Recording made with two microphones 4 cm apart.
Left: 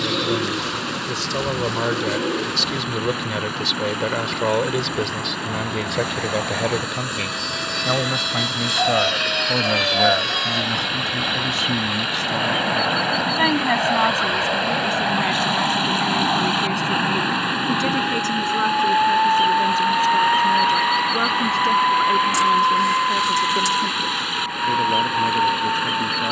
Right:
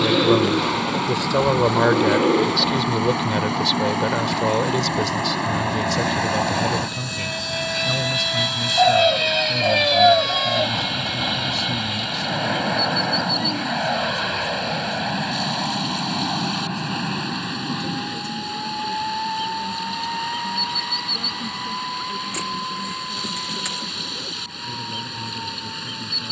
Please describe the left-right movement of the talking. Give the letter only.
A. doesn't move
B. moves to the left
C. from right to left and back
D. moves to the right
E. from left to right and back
B.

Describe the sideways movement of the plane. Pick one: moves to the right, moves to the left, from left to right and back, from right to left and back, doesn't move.
moves to the left.